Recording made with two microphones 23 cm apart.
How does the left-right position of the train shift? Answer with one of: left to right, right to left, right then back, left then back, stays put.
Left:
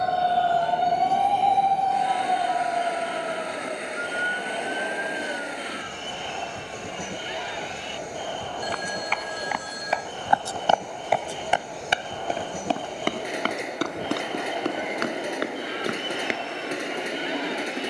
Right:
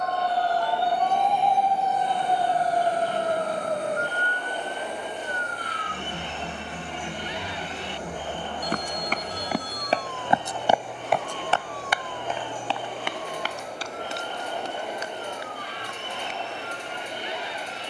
stays put.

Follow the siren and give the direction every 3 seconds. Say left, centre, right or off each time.
centre, right, right, right, right, right.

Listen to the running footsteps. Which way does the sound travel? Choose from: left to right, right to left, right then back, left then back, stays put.
right to left.